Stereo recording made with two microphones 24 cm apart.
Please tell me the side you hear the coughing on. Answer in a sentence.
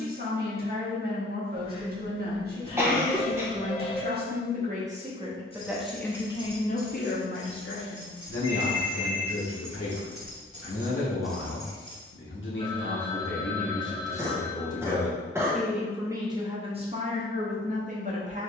You can hear the coughing in the centre.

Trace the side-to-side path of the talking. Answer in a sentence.
You can hear the talking move from right to left and back again.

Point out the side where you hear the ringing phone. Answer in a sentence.
In this clip you hear the ringing phone on the left.